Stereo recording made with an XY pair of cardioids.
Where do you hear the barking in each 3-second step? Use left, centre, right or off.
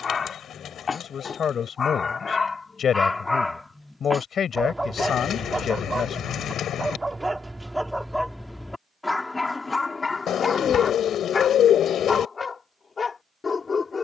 left, centre, centre, left, left.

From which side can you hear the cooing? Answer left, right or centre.
left.